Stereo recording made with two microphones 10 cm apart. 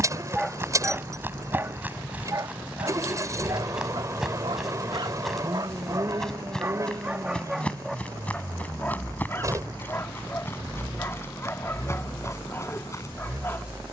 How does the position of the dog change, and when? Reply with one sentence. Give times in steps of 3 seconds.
In this clip you hear the dog on the right from 0 s, in the centre from 6 s and on the left from 9 s.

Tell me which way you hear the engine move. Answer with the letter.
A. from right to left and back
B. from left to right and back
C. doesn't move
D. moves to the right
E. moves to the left
C.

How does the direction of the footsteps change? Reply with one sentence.
You can hear the footsteps move to the left.